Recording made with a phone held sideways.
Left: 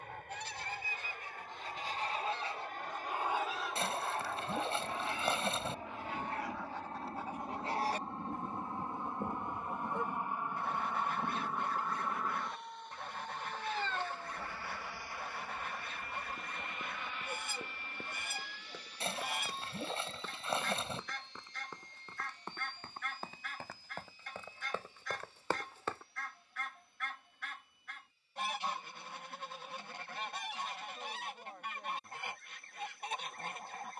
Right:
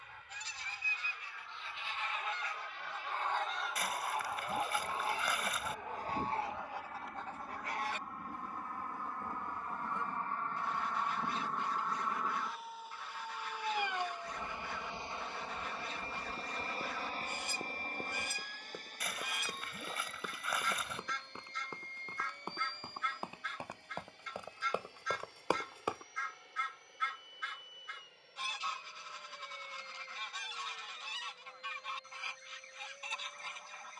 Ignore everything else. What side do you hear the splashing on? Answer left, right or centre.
left.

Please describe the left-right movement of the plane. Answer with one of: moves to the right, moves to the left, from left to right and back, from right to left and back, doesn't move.
moves to the right.